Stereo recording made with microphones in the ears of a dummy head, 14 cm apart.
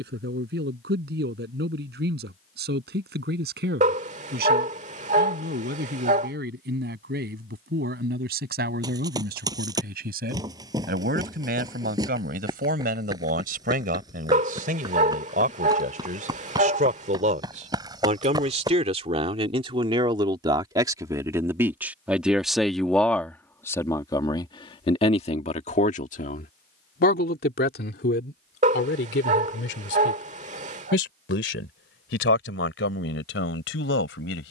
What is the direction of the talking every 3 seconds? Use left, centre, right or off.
right, right, right, right, right, right, right, centre, left, left, left, left.